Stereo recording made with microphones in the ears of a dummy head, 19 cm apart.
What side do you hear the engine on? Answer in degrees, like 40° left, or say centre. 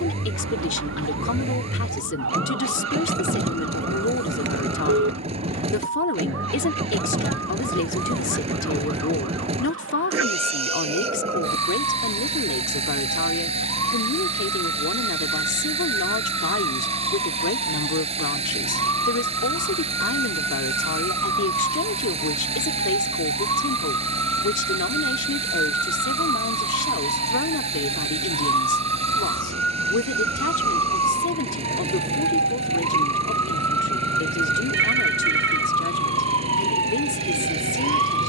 30° right.